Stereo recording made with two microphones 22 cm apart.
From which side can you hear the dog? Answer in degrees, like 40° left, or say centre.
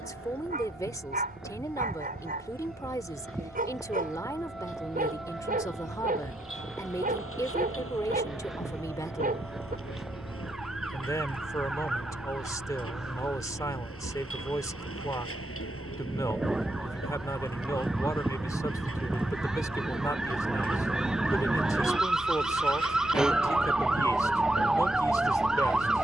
40° right.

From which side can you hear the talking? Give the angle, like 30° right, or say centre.
20° left.